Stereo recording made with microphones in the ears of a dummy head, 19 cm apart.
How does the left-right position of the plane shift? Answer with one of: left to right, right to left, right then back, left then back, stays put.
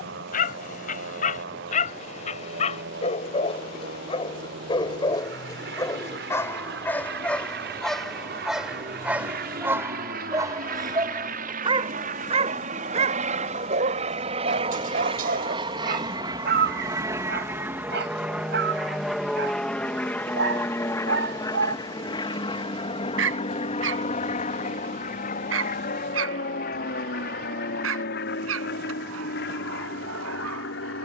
right to left.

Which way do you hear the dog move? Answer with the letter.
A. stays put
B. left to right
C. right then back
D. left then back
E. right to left
B.